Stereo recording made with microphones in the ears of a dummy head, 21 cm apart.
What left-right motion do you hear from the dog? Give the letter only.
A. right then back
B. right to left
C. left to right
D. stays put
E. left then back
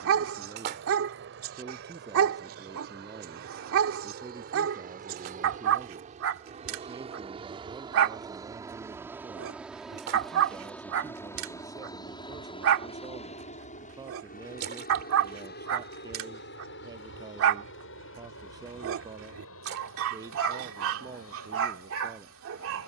D.